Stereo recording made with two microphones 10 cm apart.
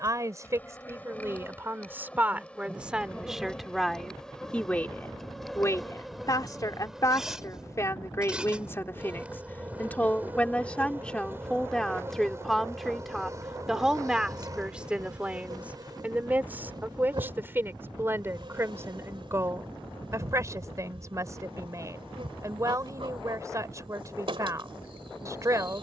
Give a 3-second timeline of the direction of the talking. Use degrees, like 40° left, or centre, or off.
20° right, 10° left, 30° left, 10° left, centre, 20° right, 30° right, 30° right, 30° right.